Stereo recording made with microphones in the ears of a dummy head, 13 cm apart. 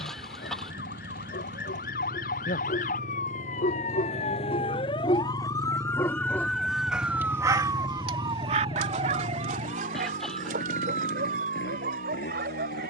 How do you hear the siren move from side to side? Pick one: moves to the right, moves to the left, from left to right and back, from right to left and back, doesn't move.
moves to the right.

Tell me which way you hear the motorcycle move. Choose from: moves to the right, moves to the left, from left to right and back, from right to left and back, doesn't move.
moves to the left.